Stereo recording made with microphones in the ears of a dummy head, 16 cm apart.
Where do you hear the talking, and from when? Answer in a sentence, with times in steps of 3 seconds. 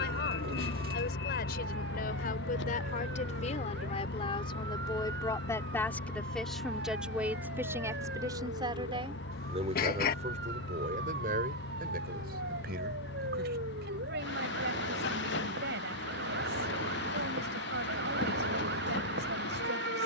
You can hear the talking on the left from 0 s, in the centre from 6 s and on the right from 9 s.